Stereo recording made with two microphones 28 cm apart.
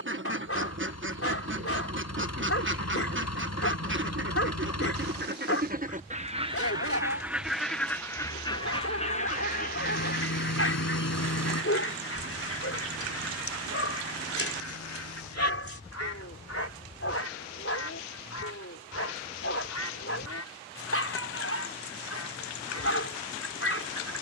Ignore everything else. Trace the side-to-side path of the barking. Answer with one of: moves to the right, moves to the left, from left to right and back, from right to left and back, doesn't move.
doesn't move.